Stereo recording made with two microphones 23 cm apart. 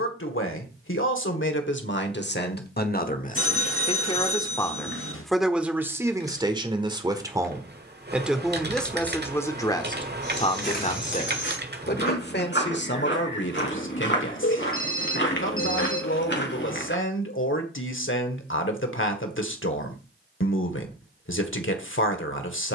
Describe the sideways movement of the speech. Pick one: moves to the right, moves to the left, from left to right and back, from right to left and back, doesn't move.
from left to right and back.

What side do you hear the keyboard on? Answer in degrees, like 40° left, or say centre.
50° right.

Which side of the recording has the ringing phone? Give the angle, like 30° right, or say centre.
60° left.